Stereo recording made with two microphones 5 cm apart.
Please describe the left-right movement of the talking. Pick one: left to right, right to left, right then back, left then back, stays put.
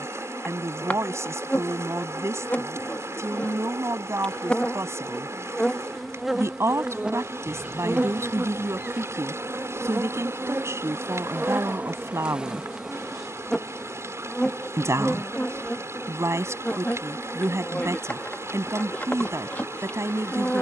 stays put.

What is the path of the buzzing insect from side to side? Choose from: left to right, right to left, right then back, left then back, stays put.
right then back.